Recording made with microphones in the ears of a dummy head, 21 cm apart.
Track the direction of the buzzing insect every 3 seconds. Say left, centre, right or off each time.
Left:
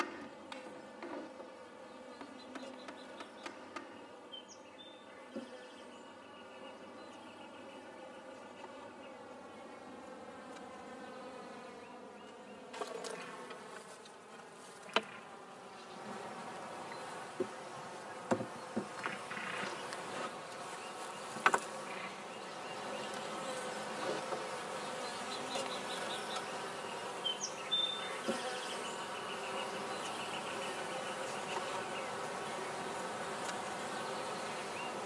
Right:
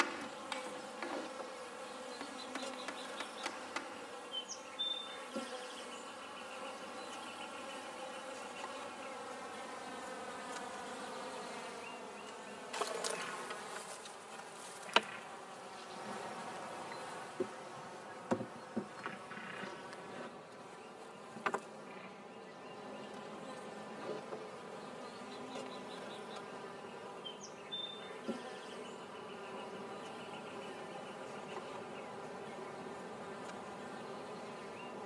right, right, right, right, right, centre, left, left, left, left, left, left.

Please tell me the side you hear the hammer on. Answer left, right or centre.
right.